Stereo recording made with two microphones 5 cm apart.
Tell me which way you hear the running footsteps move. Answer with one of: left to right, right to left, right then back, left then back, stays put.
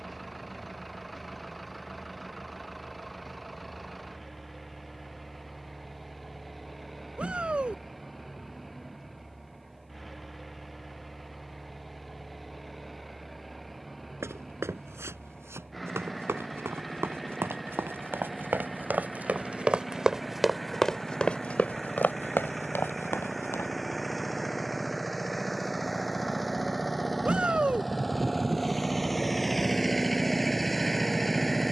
right to left.